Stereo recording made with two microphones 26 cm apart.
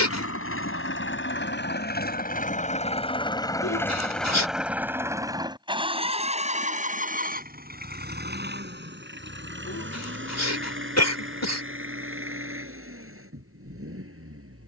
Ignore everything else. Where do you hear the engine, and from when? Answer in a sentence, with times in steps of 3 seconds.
In this clip you hear the engine on the left from 0 s, in the centre from 3 s and on the right from 6 s.